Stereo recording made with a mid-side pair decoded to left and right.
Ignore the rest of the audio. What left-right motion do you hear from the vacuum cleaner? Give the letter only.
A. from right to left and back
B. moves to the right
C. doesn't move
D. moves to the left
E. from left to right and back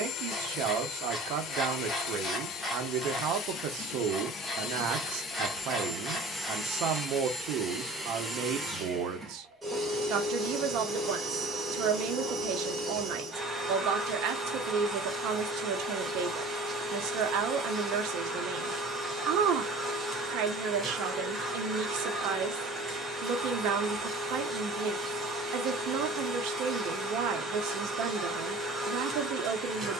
B.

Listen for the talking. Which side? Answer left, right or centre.
right.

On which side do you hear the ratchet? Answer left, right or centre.
centre.